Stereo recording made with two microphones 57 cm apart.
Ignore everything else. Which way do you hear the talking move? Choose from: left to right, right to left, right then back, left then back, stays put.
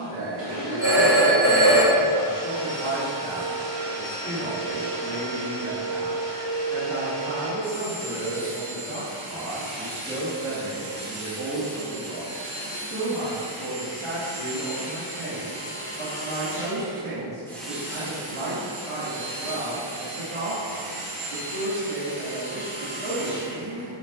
left to right.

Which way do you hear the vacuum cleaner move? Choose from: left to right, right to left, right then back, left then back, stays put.
left then back.